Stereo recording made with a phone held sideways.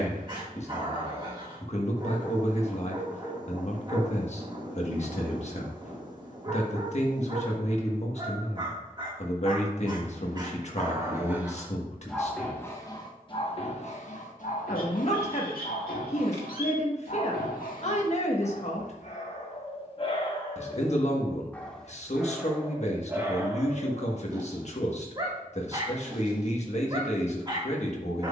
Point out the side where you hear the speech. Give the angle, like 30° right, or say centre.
50° left.